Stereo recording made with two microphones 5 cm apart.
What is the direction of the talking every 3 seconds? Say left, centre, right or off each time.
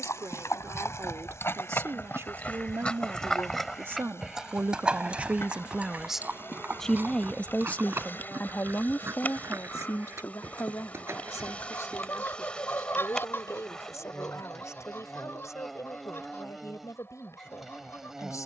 right, right, left, left, left, left.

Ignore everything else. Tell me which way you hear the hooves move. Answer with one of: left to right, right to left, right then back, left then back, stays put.
left to right.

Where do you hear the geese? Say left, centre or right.
left.